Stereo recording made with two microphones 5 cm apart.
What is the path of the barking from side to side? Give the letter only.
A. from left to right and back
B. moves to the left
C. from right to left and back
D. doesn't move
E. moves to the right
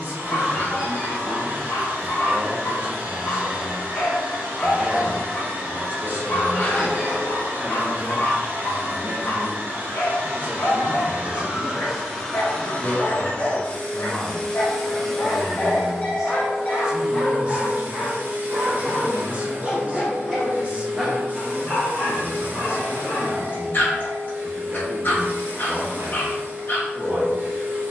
A.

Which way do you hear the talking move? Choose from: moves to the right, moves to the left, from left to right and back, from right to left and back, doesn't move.
from right to left and back.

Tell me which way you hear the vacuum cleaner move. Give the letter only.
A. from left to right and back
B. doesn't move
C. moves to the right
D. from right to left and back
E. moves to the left
D.